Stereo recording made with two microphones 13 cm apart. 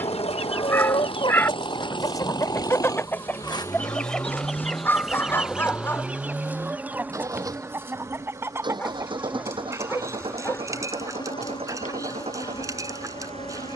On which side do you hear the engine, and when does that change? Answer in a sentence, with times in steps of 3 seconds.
In this clip you hear the engine on the left from 0 s, in the centre from 3 s and on the right from 6 s.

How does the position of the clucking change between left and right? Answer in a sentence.
You can hear the clucking go from the left side to the right.